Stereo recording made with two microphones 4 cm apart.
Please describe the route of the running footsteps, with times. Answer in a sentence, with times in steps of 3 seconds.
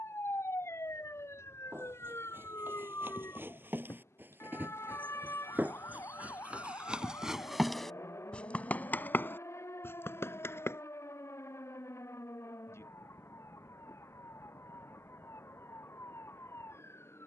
In this clip you hear the running footsteps on the right from 0 s, in the centre from 6 s, on the left from 9 s and not at all from 12 s.